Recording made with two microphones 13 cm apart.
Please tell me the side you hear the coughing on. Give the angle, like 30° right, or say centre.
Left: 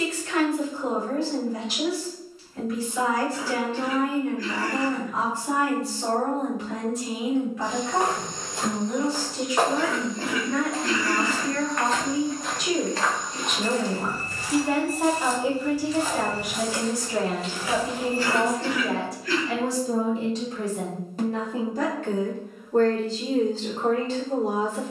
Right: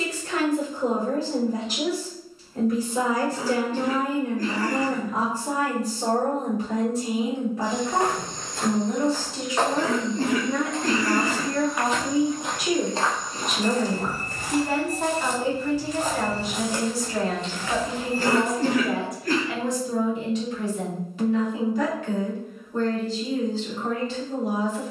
40° right.